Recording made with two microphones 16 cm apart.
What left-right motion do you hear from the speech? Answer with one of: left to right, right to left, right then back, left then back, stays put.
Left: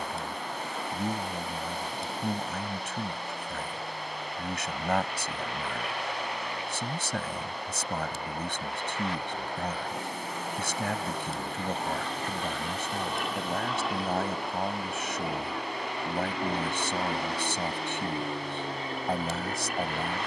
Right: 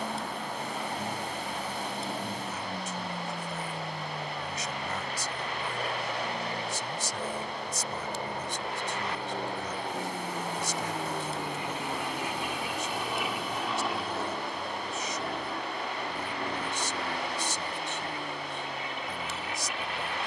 stays put.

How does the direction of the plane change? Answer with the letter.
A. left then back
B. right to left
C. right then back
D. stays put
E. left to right
B.